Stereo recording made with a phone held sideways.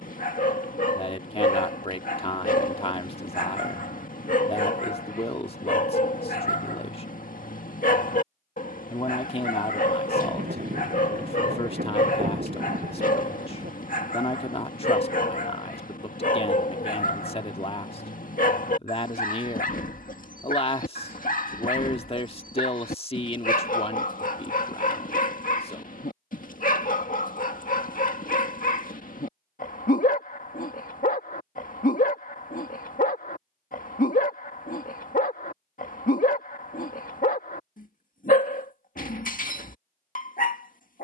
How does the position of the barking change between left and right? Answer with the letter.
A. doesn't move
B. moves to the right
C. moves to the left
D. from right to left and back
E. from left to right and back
A.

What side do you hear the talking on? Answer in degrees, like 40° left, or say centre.
40° left.